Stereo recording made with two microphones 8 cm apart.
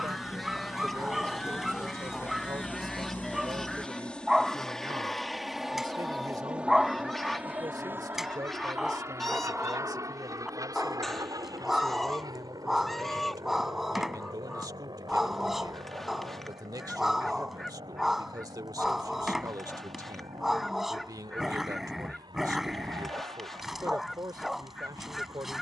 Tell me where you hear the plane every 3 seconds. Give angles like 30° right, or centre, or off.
40° left, 10° left, 20° right, 40° right, 60° right, 70° right, 70° right, 70° right, 80° right.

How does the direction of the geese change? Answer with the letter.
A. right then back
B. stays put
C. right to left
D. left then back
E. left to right
B.